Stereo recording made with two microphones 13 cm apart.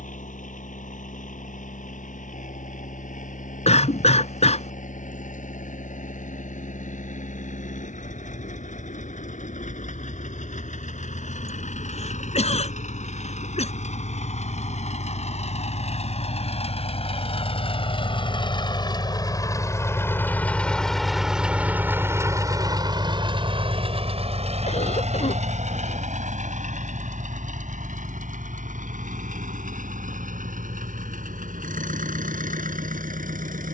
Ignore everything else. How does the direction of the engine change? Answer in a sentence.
In this clip you hear the engine travel towards the right.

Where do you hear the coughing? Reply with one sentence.
You can hear the coughing on the left.